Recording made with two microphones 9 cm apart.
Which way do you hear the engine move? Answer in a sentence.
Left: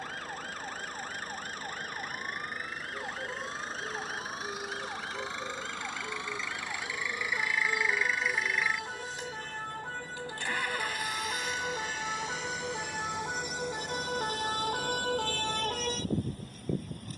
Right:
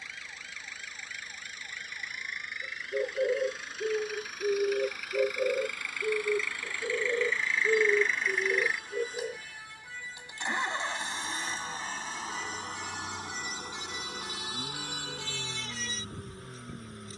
You can hear the engine travel towards the right.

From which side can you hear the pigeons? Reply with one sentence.
You can hear the pigeons on the right.